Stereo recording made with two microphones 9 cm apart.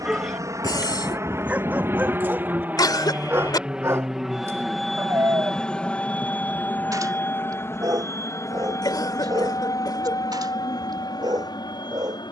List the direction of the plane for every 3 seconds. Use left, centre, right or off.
right, centre, left, left.